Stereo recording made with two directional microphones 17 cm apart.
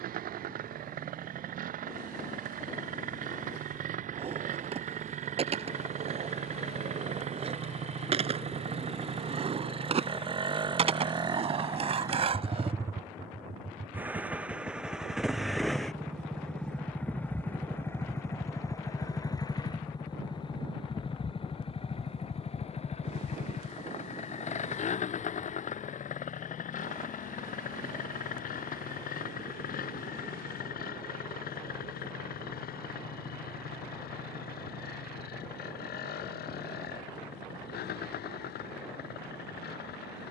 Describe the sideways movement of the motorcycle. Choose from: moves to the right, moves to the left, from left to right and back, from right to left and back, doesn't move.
moves to the left.